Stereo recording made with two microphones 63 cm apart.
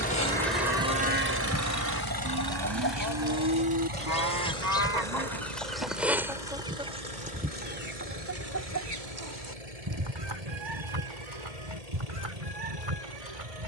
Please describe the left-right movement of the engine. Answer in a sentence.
You can hear the engine move from left to right.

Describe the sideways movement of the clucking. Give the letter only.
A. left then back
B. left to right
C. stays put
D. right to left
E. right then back
B.